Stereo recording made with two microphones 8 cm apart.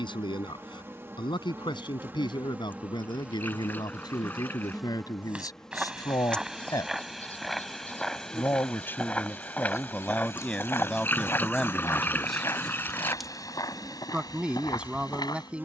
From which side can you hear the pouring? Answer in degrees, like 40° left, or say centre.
20° left.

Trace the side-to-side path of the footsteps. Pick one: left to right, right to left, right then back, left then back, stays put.
right to left.